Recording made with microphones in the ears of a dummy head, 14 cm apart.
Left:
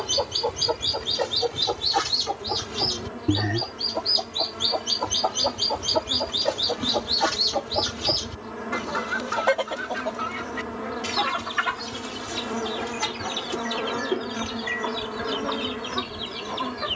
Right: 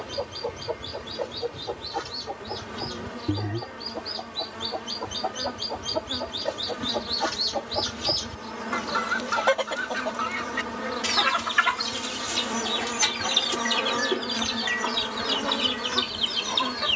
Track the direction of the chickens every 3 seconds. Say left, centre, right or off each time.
left, left, centre, right, right, right.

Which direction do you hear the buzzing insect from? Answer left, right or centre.
right.